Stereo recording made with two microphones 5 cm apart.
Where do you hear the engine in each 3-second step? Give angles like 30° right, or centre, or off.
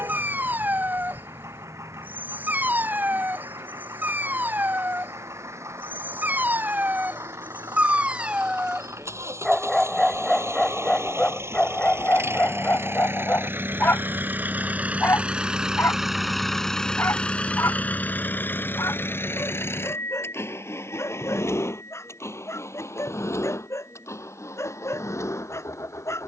80° right, 80° right, 70° right, 70° right, 50° right, centre, 50° left, 70° left, 80° left.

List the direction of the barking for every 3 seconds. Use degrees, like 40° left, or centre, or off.
40° right, 40° right, 30° right, 10° left, 40° left, 60° left, 70° left, 70° left, 70° left.